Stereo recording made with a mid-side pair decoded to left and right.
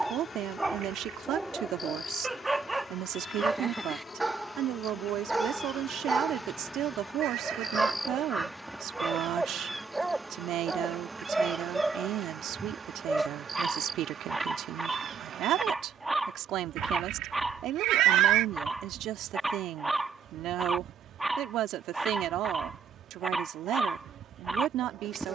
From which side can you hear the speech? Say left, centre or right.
right.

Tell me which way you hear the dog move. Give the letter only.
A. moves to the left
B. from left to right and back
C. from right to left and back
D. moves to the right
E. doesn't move
E.